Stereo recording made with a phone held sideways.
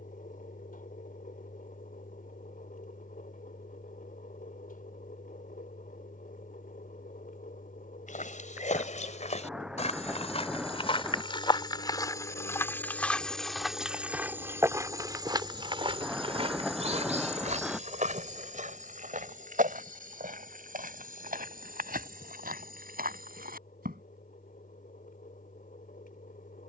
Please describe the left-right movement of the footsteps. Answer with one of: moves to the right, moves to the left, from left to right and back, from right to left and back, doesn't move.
moves to the right.